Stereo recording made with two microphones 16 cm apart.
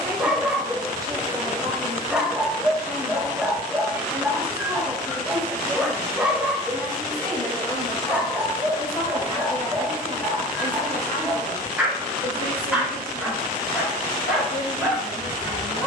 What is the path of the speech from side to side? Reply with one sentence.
You can hear the speech go from the right side to the left.